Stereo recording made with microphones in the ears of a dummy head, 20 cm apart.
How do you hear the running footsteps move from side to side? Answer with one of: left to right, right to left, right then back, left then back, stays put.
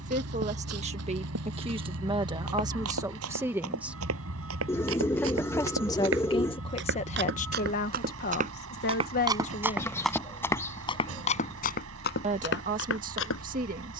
right to left.